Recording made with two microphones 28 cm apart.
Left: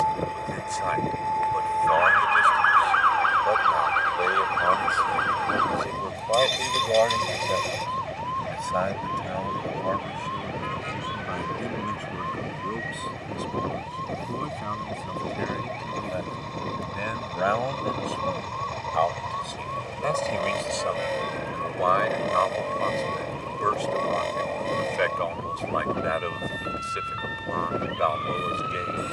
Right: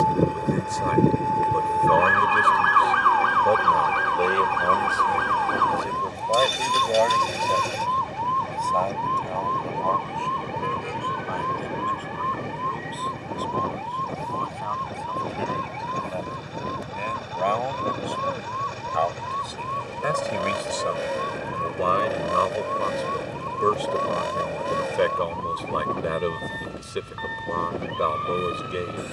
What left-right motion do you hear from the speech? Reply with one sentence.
In this clip you hear the speech go left and come back.